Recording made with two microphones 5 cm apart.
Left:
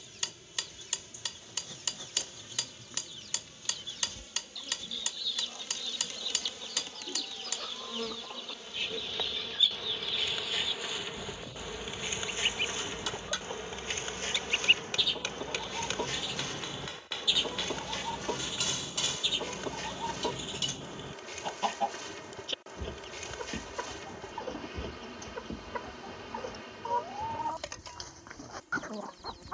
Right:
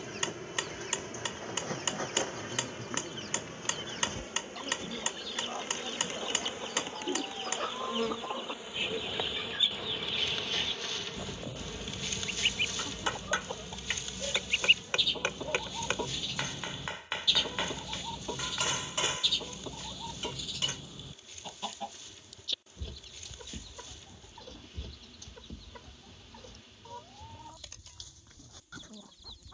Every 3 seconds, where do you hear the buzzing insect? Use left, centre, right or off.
right, right, right, centre, left, left, left, left, left, left.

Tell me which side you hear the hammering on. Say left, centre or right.
right.